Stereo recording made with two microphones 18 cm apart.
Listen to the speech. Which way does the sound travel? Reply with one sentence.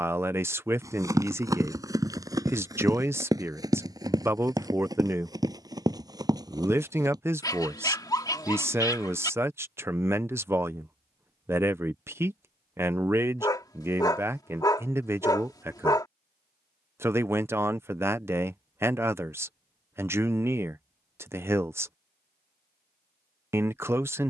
You can hear the speech stay in one place.